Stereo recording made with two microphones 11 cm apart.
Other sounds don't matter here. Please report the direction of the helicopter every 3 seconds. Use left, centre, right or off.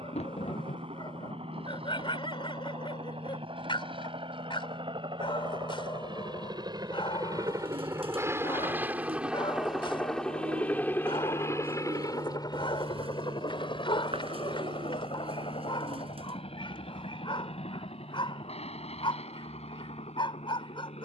right, right, right, centre, left, left, left.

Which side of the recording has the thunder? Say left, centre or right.
left.